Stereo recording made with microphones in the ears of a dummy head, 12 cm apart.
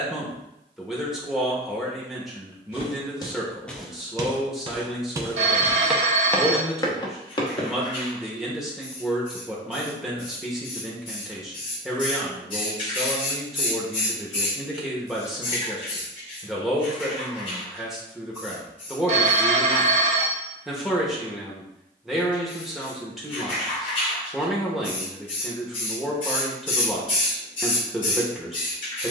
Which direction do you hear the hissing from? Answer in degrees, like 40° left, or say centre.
40° left.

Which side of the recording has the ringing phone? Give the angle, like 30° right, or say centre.
50° right.